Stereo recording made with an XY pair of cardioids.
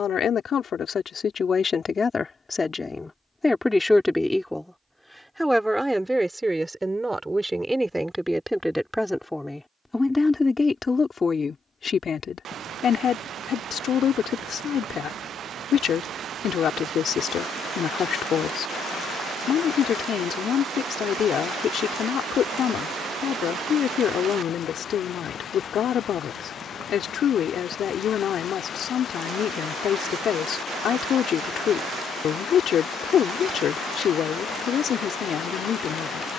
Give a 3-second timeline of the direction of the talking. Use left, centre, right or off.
left, centre, centre, left, left, left, left, left, left, left, left, left.